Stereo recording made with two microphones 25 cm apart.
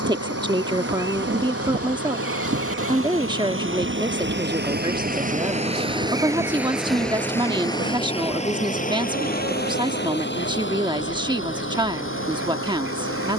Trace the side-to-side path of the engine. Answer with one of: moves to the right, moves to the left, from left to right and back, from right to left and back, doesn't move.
moves to the left.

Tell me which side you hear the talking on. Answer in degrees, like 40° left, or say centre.
20° right.